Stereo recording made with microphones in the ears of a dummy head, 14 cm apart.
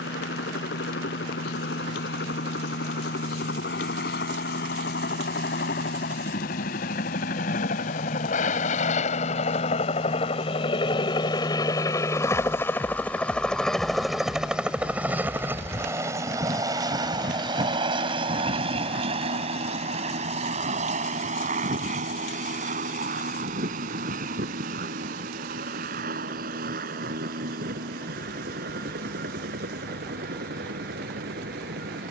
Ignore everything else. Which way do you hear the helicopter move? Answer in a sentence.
You can hear the helicopter move to the right.